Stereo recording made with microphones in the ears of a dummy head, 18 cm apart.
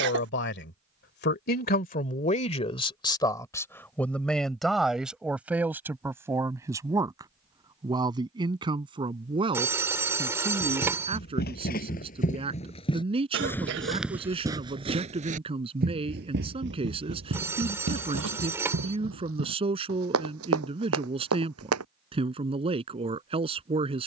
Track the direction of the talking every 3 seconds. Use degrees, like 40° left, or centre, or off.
50° left, centre, 20° right, 30° right, 30° right, 30° right, 30° right, 30° right.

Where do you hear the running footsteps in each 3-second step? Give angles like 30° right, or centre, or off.
off, off, off, 50° left, 10° left, 60° right, 70° right, 80° right.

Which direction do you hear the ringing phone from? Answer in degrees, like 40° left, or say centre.
10° right.